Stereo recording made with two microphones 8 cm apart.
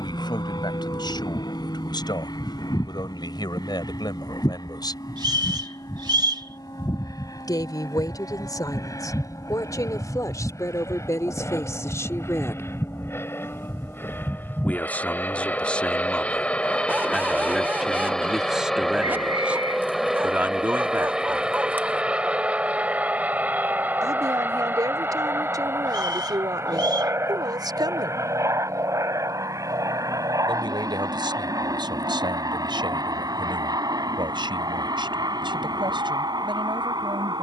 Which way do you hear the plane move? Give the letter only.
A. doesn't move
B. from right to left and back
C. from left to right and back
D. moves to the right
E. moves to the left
D.